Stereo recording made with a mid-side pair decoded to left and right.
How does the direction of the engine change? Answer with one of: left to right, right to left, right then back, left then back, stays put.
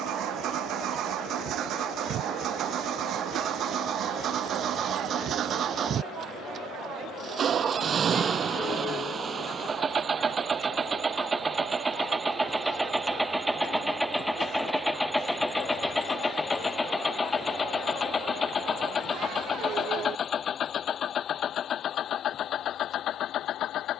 right to left.